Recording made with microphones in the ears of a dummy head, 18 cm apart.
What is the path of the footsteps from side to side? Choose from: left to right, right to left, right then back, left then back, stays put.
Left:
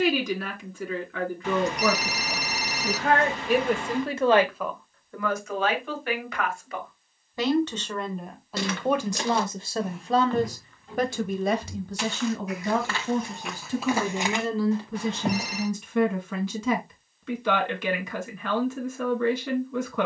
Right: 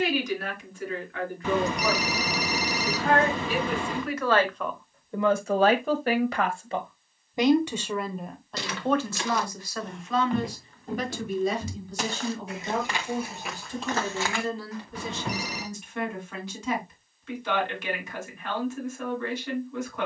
right then back.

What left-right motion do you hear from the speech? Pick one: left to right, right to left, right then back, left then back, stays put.
right then back.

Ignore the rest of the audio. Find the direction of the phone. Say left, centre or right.
right.